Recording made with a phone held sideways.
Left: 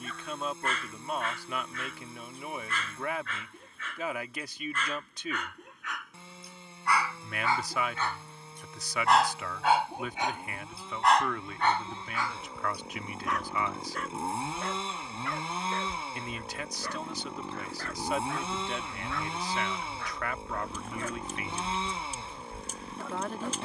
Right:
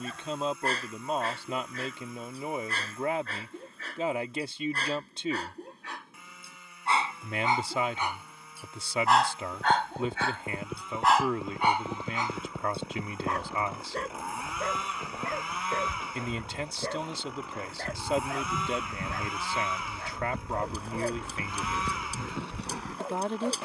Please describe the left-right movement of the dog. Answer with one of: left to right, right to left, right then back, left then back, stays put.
left then back.